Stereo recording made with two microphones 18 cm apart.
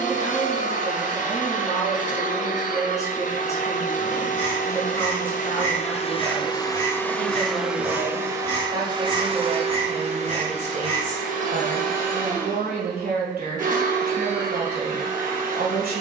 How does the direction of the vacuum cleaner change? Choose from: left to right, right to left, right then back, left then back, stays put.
left to right.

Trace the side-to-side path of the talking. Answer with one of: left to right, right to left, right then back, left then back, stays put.
left to right.